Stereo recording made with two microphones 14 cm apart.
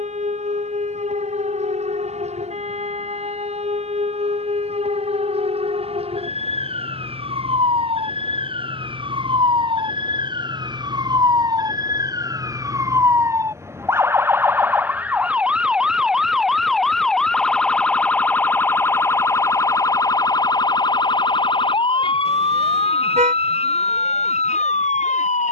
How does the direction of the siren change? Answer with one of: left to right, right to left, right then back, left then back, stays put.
right to left.